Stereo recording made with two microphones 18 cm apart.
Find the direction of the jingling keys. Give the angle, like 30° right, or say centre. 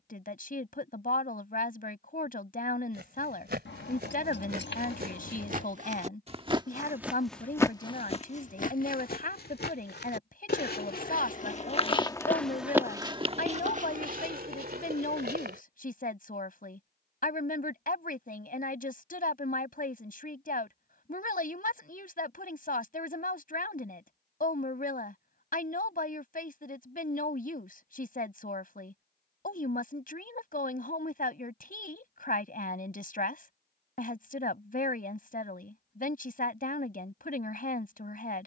90° left.